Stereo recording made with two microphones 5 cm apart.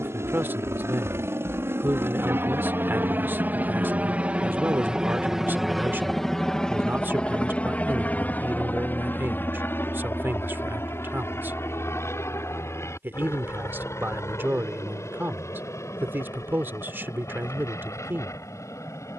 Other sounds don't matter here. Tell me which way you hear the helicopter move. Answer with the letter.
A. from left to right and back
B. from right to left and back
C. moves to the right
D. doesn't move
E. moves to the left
E.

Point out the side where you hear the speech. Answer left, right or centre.
right.